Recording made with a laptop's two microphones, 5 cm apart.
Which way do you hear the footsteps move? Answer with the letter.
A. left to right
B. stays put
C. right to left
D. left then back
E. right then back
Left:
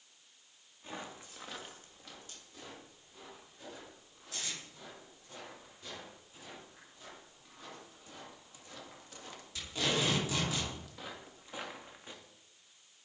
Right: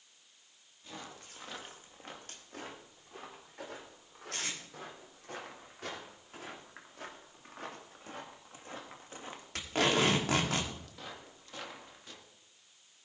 E.